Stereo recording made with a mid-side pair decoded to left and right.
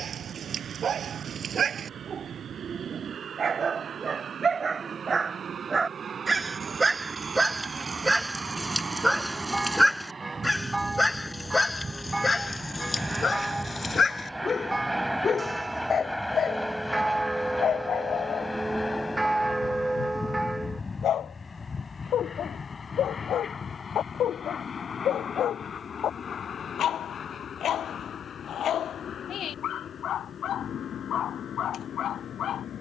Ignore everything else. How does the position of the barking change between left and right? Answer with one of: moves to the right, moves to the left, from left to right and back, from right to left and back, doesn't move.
moves to the left.